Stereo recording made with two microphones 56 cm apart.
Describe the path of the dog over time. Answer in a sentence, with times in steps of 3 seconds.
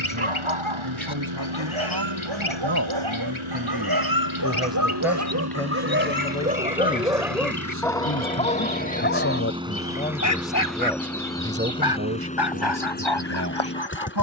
In this clip you hear the dog on the right from 0 s, in the centre from 6 s and on the left from 9 s.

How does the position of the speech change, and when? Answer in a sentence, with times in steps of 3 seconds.
You can hear the speech on the right from 0 s, in the centre from 3 s, on the left from 6 s, in the centre from 9 s and on the right from 12 s.